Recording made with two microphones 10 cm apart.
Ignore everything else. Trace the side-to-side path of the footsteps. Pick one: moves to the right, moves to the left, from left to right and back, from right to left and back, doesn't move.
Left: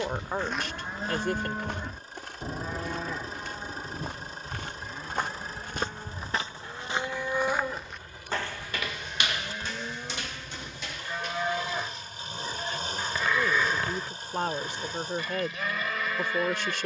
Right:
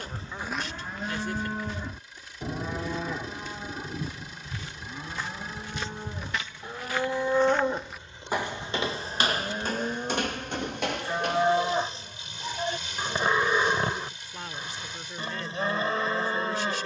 from right to left and back.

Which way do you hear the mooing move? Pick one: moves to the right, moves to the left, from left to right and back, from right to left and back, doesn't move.
moves to the right.